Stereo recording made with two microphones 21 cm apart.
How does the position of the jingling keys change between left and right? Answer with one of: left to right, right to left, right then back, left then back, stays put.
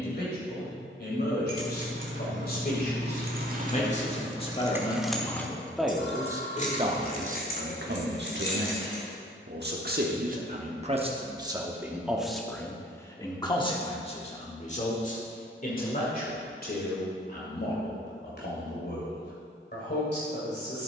right to left.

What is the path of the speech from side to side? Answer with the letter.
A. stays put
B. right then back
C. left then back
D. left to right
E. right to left
B.